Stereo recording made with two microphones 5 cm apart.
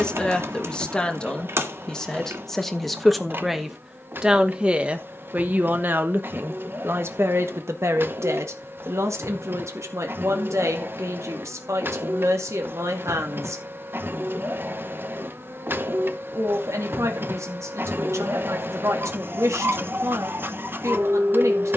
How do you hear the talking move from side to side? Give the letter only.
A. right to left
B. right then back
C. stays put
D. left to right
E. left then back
D.